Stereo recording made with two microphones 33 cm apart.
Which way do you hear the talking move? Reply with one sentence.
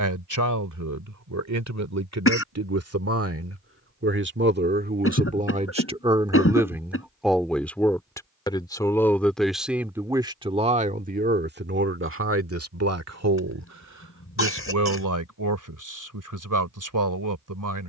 You can hear the talking go left and come back.